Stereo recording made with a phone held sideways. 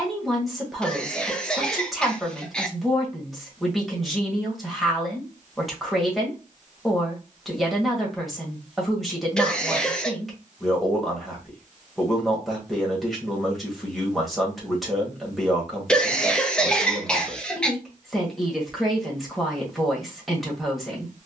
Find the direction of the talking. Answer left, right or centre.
centre.